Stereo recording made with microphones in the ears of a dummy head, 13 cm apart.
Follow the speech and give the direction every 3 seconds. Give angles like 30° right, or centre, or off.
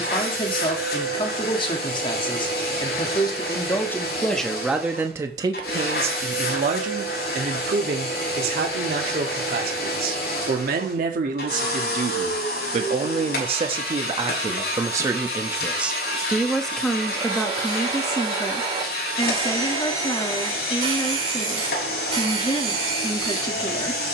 30° left, centre, 60° right, 60° right, 40° right, centre, 30° left, 30° left.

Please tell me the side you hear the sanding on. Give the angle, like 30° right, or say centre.
40° right.